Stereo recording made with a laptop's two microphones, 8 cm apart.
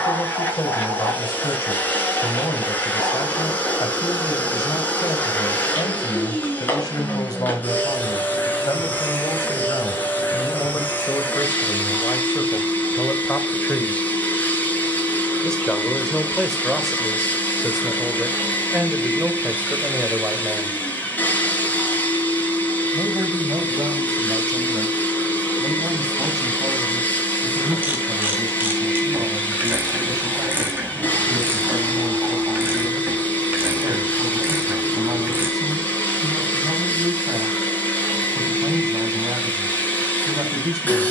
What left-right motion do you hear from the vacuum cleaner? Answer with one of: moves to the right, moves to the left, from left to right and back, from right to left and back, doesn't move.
doesn't move.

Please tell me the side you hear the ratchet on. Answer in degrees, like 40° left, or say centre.
20° right.